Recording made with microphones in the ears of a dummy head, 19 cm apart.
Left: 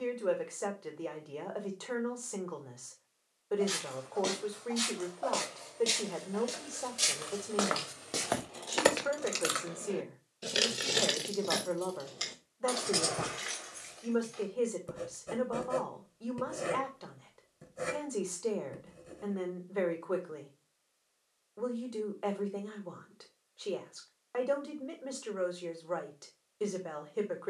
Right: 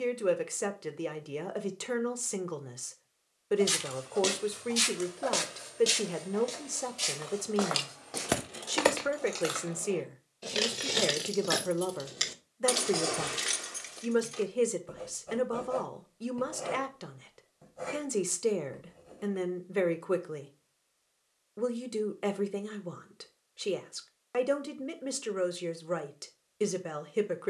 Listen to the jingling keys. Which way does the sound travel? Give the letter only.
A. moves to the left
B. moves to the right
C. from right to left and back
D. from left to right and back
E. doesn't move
C.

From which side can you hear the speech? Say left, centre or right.
right.